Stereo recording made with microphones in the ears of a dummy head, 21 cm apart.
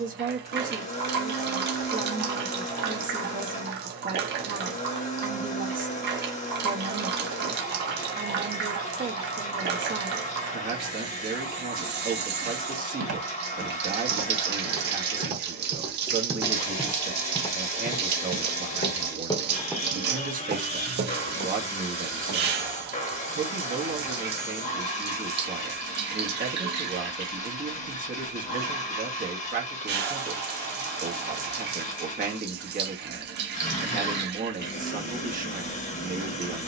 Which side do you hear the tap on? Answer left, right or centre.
right.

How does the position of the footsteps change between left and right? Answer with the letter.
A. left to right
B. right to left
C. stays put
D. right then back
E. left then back
E.